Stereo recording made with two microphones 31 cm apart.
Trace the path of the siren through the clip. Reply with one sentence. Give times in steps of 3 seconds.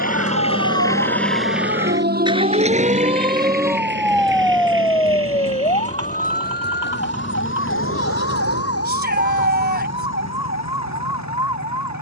In this clip you hear the siren on the right from 0 s, in the centre from 3 s and on the left from 6 s.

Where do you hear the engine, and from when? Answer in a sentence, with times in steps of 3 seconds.
In this clip you hear the engine in the centre from 0 s and on the right from 3 s.